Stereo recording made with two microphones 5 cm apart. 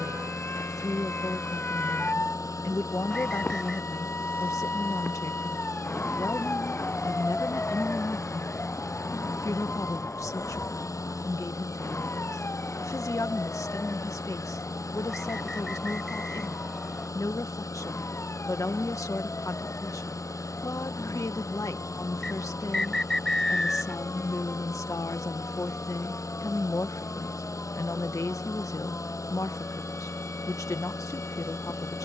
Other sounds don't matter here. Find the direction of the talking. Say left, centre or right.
left.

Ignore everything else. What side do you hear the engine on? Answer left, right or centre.
left.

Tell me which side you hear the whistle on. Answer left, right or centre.
centre.